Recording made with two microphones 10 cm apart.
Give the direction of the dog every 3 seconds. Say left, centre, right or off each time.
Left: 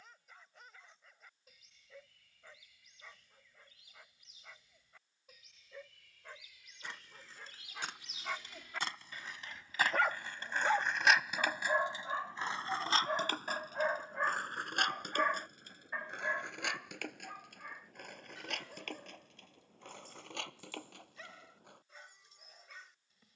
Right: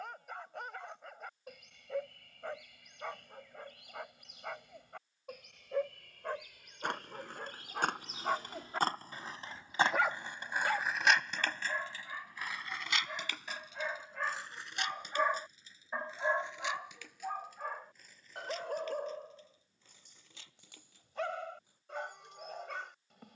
right, right, right, centre, left, right, right, right.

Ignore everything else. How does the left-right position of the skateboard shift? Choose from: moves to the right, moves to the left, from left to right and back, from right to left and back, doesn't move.
moves to the left.